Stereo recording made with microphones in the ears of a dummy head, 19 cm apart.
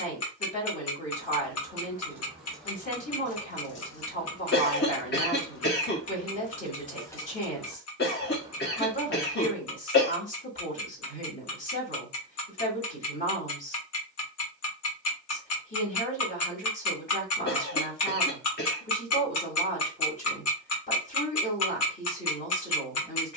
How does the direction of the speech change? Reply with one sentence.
You can hear the speech stay put.